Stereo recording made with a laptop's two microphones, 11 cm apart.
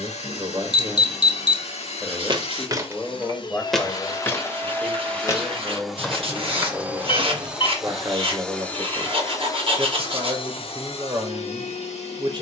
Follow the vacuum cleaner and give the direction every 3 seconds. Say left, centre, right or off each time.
left, left, centre, left.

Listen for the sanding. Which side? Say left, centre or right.
right.